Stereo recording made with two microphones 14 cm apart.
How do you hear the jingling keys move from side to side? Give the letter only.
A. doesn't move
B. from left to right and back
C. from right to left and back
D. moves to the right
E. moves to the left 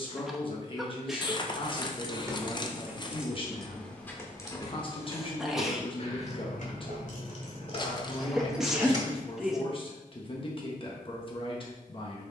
C.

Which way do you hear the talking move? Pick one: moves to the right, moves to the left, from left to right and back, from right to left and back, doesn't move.
doesn't move.